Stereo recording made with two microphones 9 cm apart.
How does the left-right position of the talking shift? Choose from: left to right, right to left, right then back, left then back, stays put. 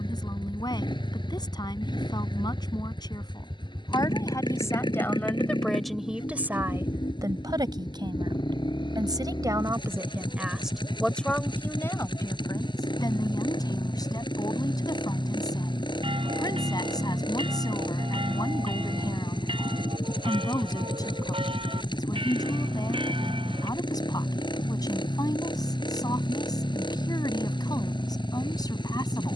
right then back.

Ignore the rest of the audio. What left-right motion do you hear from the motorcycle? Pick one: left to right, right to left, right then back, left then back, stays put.
stays put.